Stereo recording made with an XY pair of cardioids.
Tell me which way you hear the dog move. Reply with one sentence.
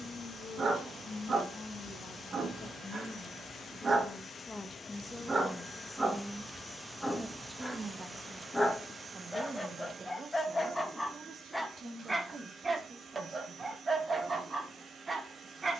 You can hear the dog go left and come back.